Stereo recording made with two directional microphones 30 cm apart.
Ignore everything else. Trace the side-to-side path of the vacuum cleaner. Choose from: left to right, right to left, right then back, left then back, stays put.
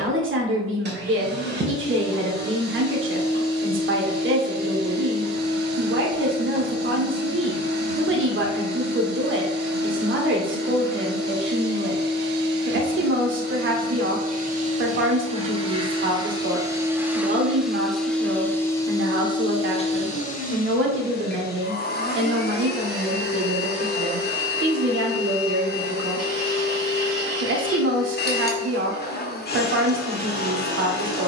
right to left.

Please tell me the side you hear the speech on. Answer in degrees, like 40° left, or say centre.
40° right.